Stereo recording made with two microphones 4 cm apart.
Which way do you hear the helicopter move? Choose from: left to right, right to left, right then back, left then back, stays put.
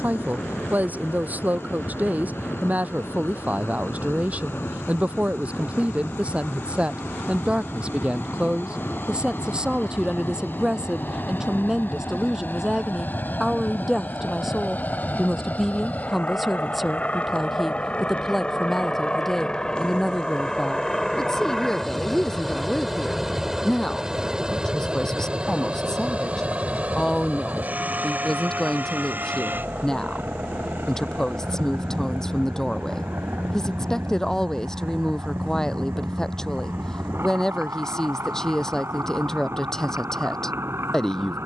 left to right.